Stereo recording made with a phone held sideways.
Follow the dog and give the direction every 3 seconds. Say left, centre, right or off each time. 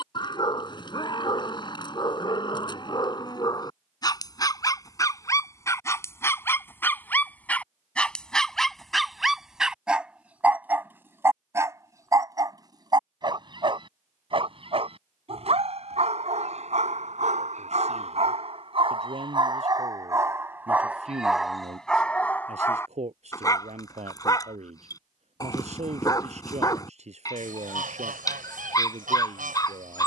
left, left, centre, centre, right, right, right, centre, left, left.